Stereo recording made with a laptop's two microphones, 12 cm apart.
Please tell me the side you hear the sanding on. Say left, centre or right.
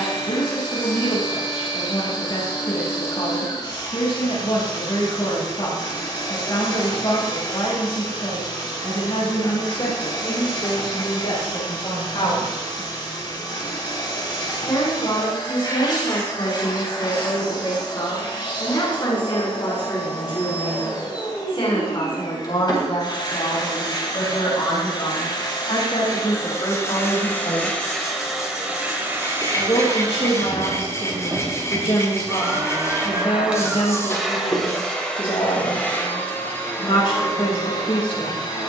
left.